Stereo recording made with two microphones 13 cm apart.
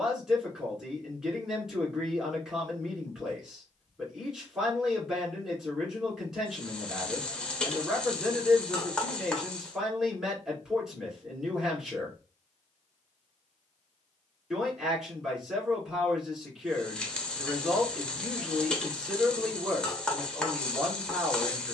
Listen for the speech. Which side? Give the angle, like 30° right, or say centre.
centre.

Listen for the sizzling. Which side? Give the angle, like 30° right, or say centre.
10° left.